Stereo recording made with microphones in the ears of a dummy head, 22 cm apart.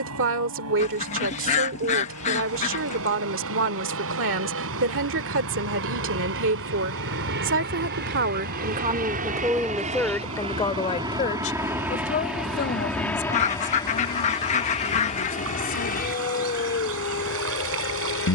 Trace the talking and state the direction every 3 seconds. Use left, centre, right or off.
right, right, right, centre, left, left.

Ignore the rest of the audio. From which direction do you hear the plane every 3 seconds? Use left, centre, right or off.
right, right, right, right, centre, left.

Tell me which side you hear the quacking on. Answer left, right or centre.
left.